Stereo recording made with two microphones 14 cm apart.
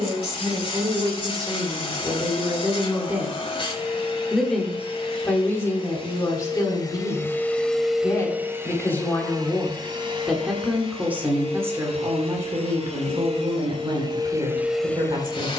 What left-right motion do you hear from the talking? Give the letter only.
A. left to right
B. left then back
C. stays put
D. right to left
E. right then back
B.